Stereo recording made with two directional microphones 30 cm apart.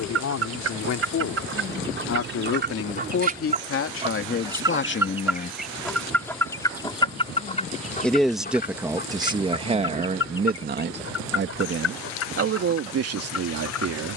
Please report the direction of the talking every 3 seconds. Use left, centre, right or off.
left, left, centre, right, right.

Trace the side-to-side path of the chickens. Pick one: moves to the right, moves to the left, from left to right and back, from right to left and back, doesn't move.
moves to the left.